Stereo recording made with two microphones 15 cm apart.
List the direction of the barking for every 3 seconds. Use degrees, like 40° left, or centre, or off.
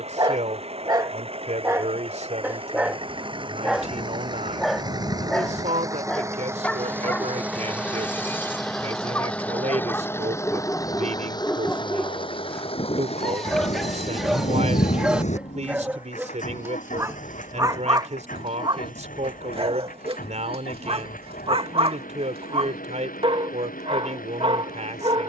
20° right, centre, 10° left, 10° left, centre, 20° right, 40° right, 40° right, 40° right.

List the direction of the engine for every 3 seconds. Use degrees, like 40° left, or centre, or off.
40° right, 30° right, 10° right, 20° left, 50° left, 70° left, 70° left, 80° left, 80° left.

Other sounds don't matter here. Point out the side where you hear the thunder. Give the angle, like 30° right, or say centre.
60° left.